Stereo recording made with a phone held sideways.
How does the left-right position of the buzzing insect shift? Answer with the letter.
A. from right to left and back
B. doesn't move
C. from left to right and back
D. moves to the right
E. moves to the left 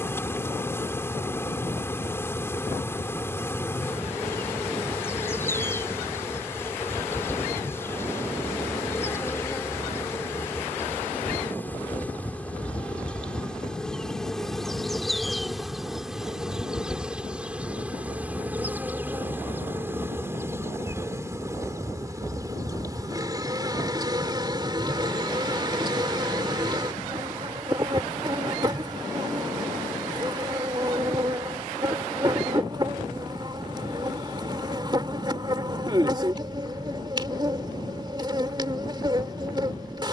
D.